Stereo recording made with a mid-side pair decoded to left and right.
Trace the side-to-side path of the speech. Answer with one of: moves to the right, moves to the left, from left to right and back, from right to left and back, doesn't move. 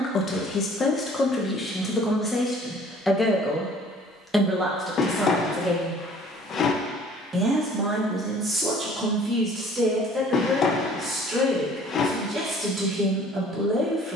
moves to the right.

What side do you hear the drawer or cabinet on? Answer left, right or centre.
left.